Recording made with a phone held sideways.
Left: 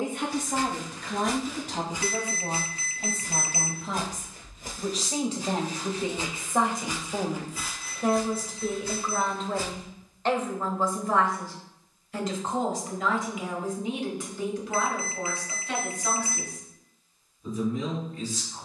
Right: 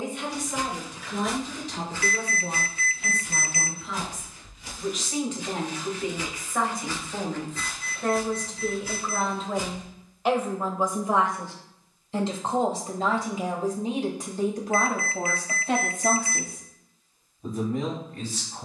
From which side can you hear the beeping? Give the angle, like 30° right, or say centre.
30° left.